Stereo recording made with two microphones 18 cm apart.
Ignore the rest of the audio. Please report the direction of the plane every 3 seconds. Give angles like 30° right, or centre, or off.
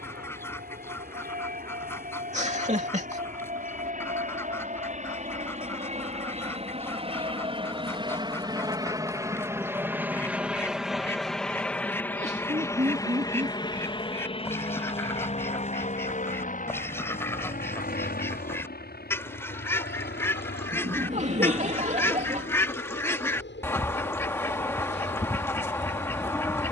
60° right, 50° right, 30° right, 10° right, 20° left, 40° left, 50° left, 60° left, 70° left.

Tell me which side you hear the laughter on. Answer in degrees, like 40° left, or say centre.
40° right.